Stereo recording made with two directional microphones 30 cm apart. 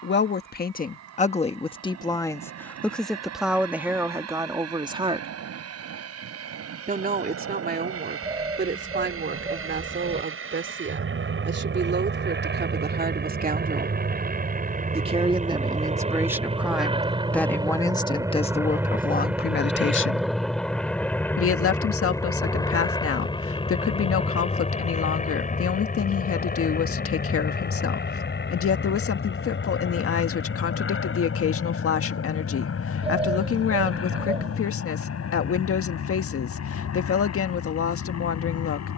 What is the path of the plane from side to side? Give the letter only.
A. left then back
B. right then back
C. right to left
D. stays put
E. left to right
C.